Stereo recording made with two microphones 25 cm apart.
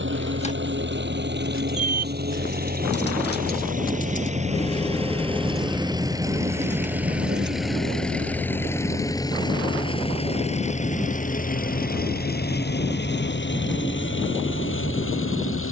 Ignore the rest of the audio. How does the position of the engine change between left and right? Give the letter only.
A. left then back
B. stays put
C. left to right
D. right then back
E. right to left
E.